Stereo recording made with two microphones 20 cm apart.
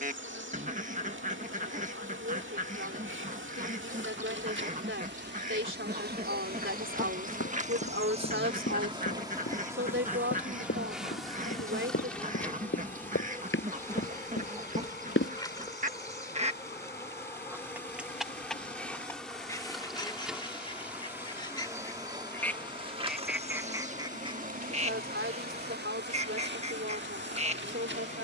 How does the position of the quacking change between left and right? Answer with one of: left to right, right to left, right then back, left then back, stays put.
left then back.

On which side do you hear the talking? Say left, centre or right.
right.